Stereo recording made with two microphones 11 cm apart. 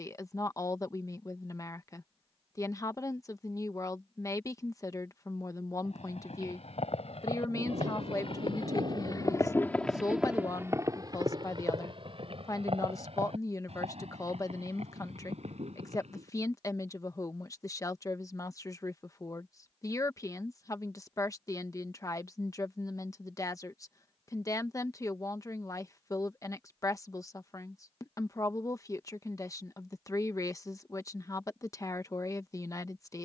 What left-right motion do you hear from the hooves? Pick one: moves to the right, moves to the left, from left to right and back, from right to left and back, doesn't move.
moves to the right.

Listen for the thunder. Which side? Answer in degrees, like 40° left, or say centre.
70° right.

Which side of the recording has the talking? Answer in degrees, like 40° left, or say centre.
30° left.